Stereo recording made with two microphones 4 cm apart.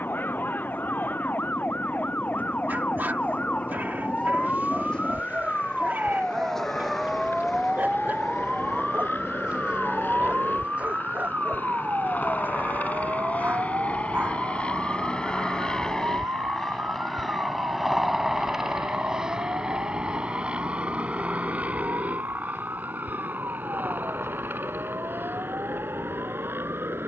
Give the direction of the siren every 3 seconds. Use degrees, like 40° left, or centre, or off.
40° left, 20° left, centre, 30° right, 50° right, 60° right, 60° right, 70° right, 70° right.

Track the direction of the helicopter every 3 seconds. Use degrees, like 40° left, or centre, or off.
70° left, 70° left, 60° left, 50° left, 30° left, 10° left, 20° right, 30° right, 50° right.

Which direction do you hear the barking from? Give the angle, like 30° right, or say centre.
40° right.